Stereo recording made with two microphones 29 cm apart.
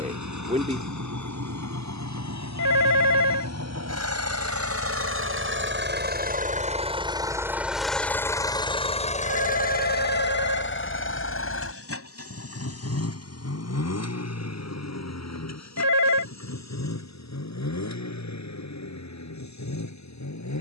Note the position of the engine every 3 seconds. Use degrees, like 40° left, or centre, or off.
70° right, 50° right, 10° right, 40° left, 60° left, 60° left, 70° left.